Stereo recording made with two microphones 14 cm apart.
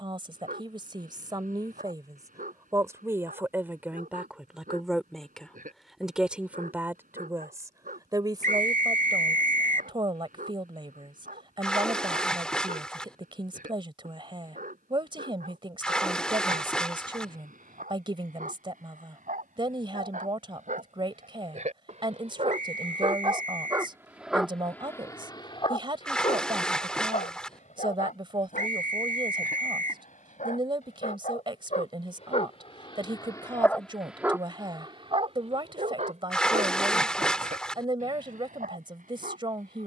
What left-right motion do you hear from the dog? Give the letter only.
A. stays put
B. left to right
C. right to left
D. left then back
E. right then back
D.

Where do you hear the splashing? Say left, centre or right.
centre.